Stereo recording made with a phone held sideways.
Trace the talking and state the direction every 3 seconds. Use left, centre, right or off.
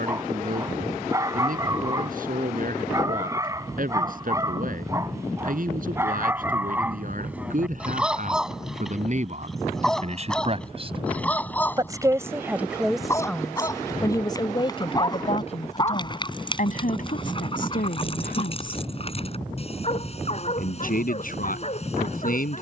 right, right, right, right, centre, left, left, left.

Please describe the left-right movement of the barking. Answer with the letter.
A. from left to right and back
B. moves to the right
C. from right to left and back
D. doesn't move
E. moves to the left
E.